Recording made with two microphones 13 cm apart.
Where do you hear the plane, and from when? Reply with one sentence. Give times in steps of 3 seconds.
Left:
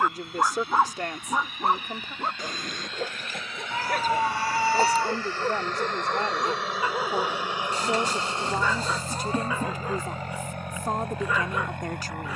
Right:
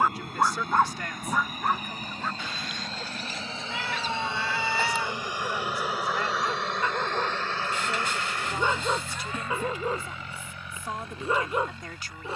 In this clip you hear the plane on the right from 0 s, in the centre from 6 s and on the left from 9 s.